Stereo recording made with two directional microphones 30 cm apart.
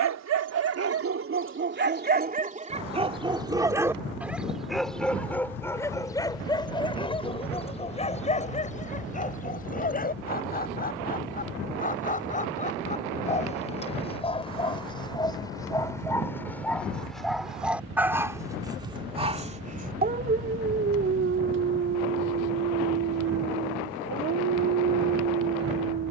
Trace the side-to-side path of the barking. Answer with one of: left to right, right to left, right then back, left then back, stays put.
left then back.